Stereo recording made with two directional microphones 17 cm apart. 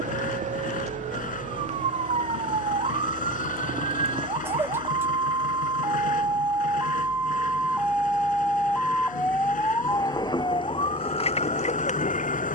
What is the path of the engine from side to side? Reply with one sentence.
In this clip you hear the engine stay put.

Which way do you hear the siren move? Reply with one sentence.
In this clip you hear the siren travel towards the left.